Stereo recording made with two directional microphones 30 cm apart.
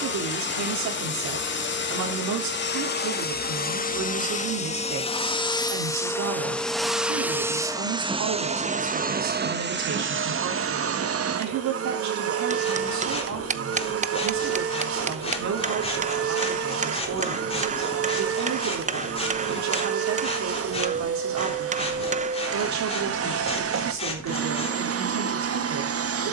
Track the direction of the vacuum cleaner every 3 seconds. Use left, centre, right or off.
left, left, centre, right, right, right, right, right, right.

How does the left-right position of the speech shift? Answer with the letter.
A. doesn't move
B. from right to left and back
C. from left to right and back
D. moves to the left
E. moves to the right
A.